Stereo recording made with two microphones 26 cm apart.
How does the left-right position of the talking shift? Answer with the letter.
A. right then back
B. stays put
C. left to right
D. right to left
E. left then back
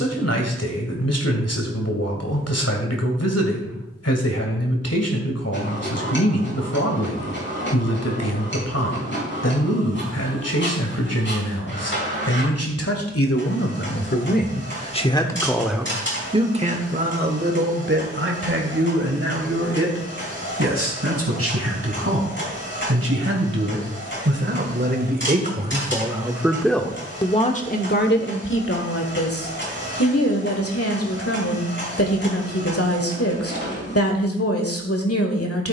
A.